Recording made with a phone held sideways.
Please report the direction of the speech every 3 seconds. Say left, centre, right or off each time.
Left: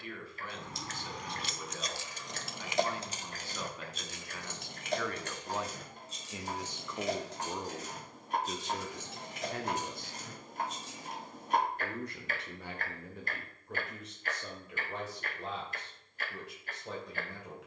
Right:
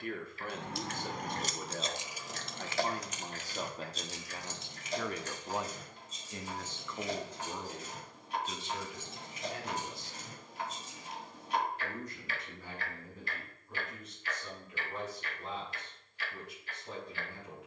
right, right, left, left, left, left.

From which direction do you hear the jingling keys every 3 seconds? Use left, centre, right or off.
right, left, left, left, off, off.